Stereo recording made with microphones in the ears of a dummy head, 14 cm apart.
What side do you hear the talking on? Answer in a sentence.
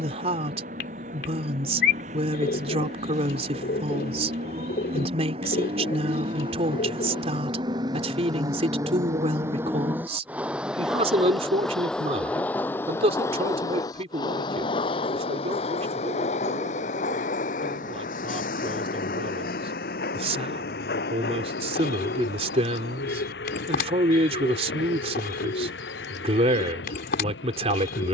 In this clip you hear the talking on the right.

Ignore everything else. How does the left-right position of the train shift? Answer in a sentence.
In this clip you hear the train go from the right side to the left.